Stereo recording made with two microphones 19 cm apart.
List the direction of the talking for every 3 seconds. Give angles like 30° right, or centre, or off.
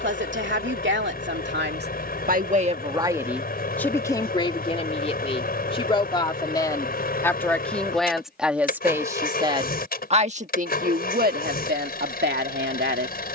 60° right, 20° left, 10° left, 40° right, 60° right.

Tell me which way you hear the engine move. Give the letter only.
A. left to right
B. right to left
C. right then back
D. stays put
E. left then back
D.